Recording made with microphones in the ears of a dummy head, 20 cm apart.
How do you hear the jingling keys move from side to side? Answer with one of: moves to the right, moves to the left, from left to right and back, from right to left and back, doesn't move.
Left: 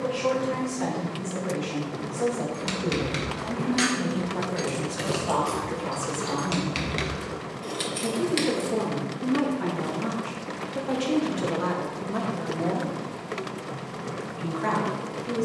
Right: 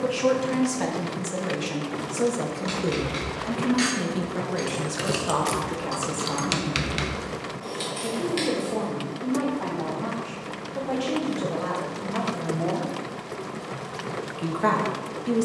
from left to right and back.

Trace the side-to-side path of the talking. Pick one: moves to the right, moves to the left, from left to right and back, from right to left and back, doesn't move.
from right to left and back.